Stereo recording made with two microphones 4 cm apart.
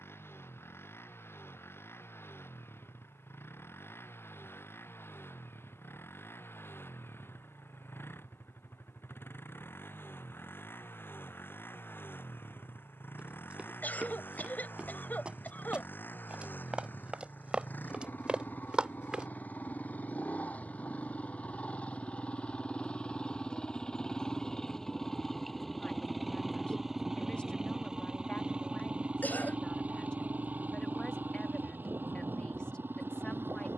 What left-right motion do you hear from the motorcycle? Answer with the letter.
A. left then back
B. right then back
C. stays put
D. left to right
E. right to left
D.